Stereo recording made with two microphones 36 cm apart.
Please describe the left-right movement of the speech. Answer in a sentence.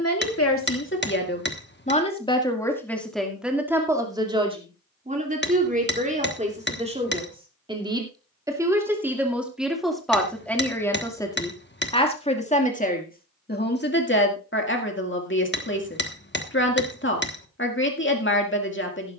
In this clip you hear the speech move from left to right and back again.